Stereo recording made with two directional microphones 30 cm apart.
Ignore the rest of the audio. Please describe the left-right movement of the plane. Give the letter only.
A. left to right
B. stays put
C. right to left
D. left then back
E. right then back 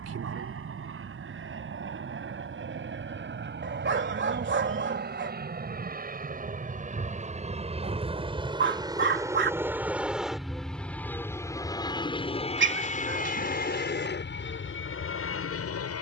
C.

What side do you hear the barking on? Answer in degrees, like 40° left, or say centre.
40° right.